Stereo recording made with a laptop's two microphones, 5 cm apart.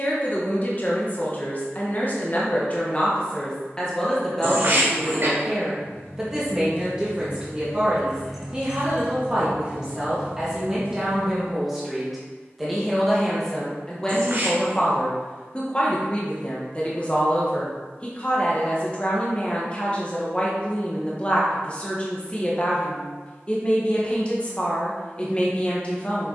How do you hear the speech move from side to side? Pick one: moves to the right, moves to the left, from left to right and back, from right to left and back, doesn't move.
from left to right and back.